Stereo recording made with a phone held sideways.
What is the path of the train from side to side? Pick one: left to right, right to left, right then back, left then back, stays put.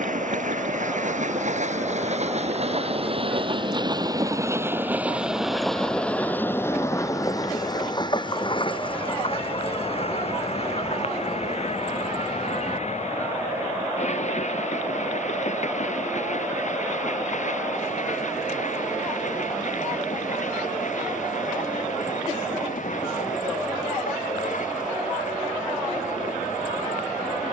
right to left.